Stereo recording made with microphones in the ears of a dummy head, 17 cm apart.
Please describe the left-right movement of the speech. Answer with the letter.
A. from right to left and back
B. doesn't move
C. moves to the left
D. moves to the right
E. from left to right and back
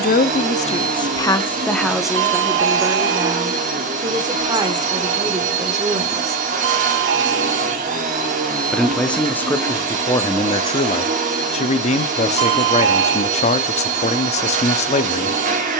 E.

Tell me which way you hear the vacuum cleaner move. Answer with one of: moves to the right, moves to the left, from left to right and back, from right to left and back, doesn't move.
doesn't move.